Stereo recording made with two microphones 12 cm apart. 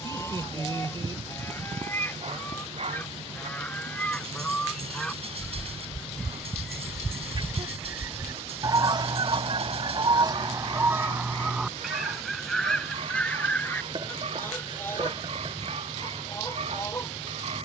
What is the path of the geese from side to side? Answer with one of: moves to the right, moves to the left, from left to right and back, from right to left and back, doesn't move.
from left to right and back.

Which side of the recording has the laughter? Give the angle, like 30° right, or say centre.
40° right.